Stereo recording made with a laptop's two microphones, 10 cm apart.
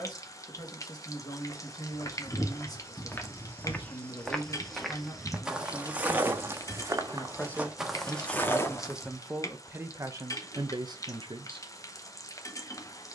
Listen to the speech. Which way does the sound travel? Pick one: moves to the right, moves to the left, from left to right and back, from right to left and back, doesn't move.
moves to the right.